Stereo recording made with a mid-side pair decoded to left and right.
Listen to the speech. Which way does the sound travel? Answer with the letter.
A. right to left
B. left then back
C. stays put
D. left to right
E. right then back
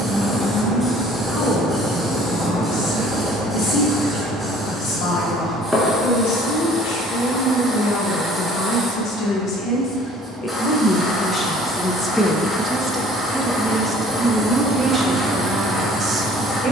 D.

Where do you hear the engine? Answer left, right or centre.
centre.